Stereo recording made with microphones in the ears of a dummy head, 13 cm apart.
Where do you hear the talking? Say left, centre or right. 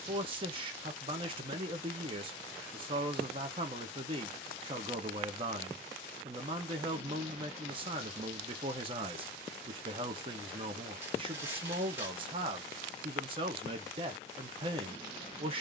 right.